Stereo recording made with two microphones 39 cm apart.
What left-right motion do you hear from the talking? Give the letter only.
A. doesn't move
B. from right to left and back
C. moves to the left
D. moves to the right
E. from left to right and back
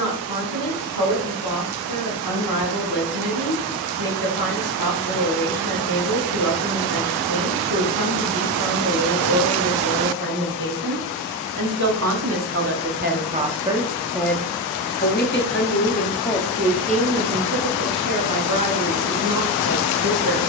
B.